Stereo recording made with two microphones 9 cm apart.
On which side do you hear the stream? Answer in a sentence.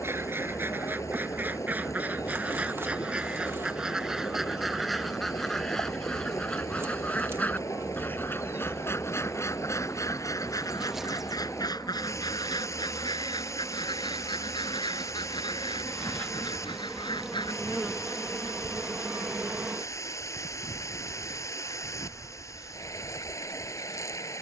In this clip you hear the stream on the left.